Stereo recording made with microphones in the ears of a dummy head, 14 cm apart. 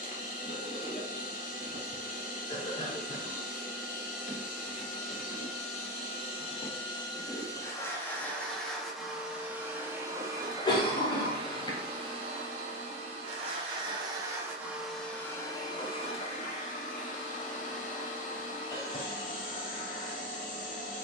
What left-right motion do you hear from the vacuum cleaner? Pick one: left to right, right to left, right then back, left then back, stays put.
right then back.